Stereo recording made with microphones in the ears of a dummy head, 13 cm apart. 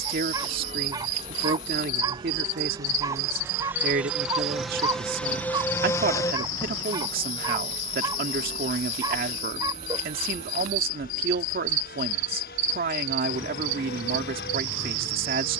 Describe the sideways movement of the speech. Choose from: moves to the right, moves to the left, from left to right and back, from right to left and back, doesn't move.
doesn't move.